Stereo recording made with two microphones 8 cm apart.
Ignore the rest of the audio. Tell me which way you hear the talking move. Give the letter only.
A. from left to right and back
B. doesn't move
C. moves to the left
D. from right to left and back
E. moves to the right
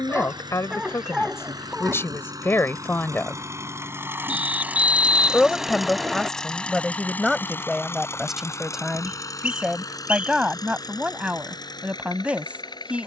E.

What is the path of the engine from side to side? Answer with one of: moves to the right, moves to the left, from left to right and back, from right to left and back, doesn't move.
moves to the left.